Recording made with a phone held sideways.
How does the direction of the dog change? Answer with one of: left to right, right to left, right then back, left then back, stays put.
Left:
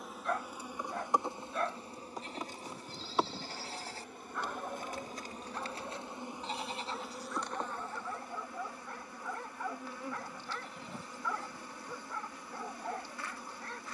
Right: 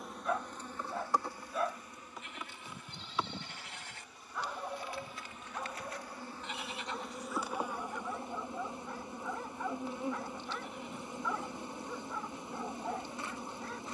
stays put.